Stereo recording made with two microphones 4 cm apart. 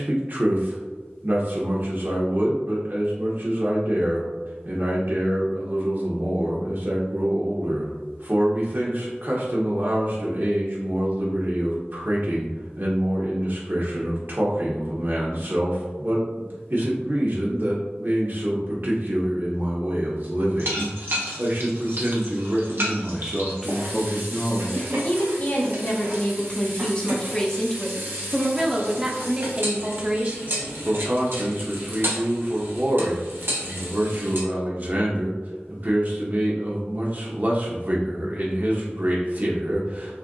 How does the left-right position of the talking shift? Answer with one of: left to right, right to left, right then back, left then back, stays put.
left then back.